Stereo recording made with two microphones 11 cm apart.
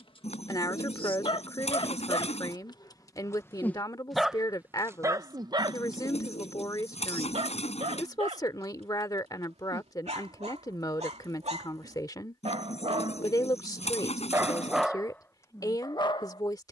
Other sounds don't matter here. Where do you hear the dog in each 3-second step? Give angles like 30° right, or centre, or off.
50° left, 20° right, 60° right, 70° right, 40° right, 40° left.